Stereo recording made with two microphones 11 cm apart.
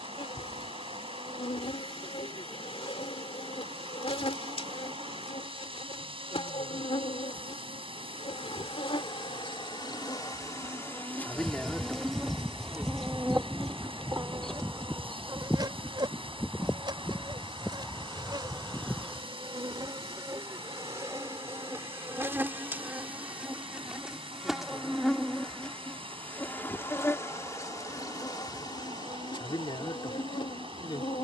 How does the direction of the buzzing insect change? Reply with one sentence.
You can hear the buzzing insect go right and come back.